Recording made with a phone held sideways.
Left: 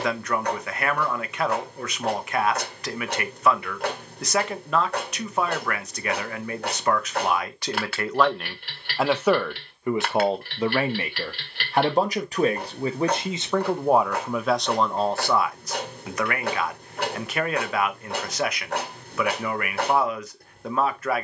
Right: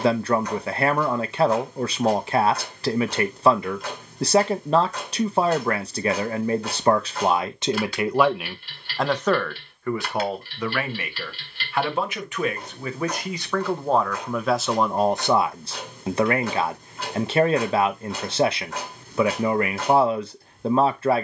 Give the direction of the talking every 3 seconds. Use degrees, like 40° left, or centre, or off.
30° right, 30° right, 20° right, 20° left, 20° left, 30° right, 30° right.